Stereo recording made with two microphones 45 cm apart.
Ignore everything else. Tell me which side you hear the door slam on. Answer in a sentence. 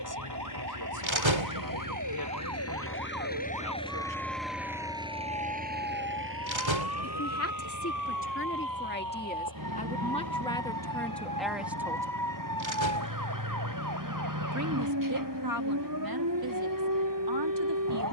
You can hear the door slam on the right.